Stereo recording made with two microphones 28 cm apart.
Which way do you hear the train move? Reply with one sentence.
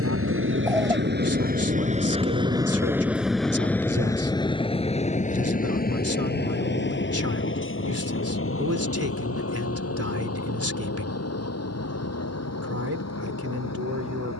In this clip you hear the train go from the right side to the left.